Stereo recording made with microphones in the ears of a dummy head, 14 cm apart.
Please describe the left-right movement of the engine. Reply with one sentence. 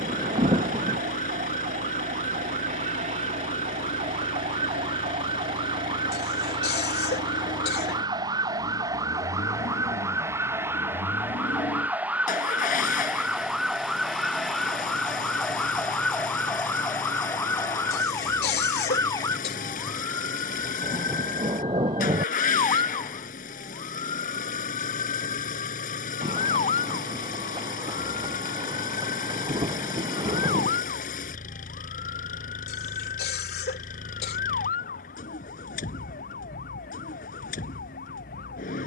You can hear the engine stay put.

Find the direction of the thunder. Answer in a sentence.
In this clip you hear the thunder on the right.